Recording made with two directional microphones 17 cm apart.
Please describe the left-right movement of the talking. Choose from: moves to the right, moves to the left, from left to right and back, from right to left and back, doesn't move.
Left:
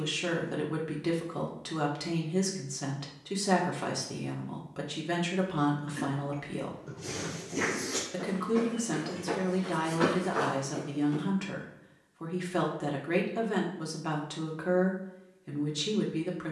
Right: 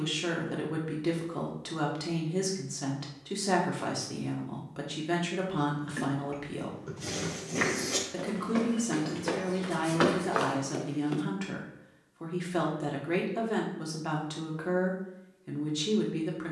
doesn't move.